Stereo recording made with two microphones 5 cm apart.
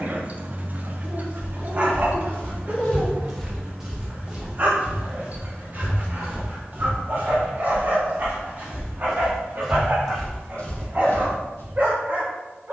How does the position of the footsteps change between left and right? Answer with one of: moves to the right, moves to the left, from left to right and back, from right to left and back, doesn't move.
from left to right and back.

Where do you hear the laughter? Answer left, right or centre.
left.